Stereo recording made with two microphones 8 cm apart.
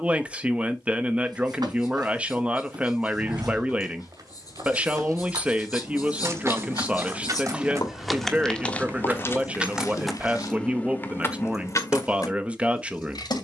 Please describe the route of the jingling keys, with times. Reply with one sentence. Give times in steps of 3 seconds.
You can hear the jingling keys not at all from 0 s, on the right from 3 s, in the centre from 9 s and on the left from 12 s.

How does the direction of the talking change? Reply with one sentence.
In this clip you hear the talking stay put.